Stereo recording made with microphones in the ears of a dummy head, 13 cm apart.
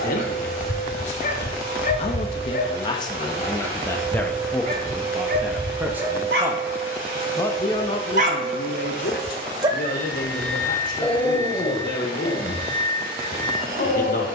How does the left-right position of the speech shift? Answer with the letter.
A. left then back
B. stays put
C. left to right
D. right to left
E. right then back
E.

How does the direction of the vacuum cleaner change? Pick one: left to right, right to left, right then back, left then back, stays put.
stays put.